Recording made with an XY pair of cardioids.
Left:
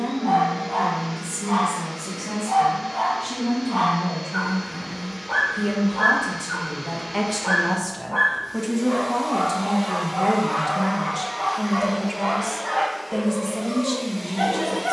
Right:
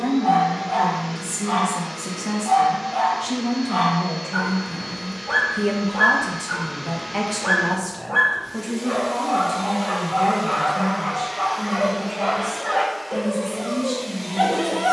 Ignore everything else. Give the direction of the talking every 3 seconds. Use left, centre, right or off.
right, right, centre, left, left.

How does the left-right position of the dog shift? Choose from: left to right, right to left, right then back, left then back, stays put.
stays put.